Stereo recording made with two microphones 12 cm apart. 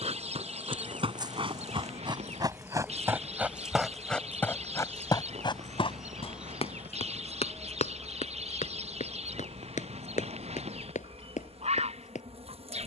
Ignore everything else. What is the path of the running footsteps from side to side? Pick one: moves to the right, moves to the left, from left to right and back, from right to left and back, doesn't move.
moves to the left.